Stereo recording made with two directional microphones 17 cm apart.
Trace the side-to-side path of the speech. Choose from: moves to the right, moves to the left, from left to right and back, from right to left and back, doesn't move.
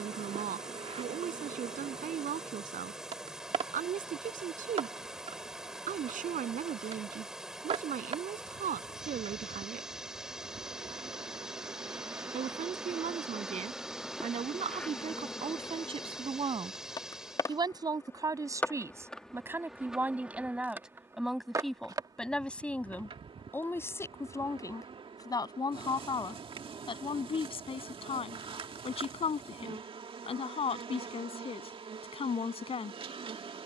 moves to the left.